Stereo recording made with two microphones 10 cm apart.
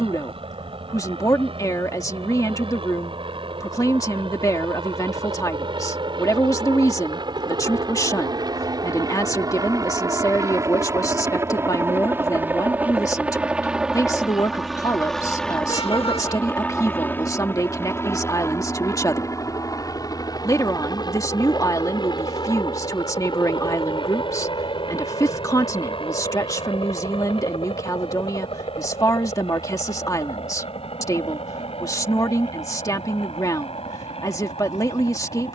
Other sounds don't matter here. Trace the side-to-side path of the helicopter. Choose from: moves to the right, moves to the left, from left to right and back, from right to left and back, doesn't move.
moves to the left.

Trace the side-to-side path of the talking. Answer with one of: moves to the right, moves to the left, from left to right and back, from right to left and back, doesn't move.
doesn't move.